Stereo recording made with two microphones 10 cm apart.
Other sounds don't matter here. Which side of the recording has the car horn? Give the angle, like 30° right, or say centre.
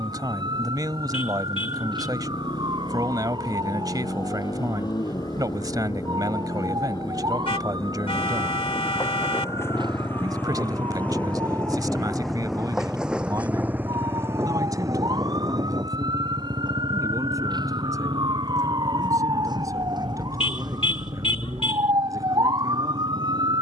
70° left.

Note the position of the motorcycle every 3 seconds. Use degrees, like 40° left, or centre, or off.
60° left, 50° left, 40° left, 20° left, 10° right, 50° right, 70° right, 80° right.